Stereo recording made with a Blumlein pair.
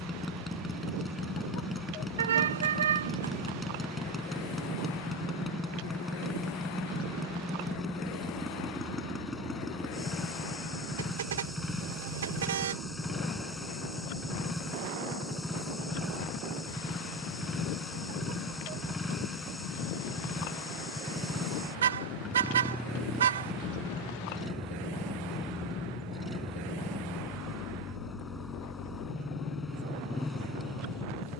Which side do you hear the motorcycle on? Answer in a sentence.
You can hear the motorcycle in the centre.